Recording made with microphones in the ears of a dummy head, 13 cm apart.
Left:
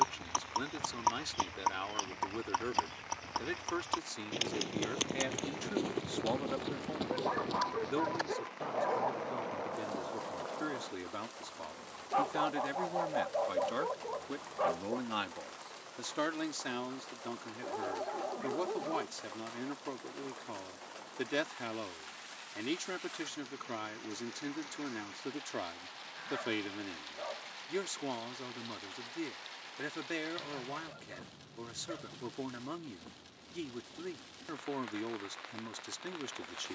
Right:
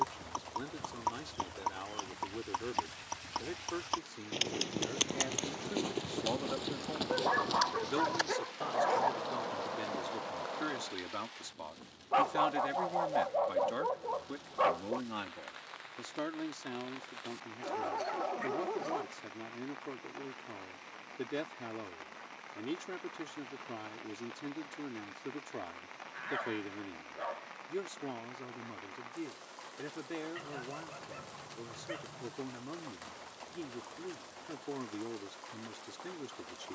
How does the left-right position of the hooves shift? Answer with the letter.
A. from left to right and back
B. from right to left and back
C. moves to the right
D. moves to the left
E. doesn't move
C.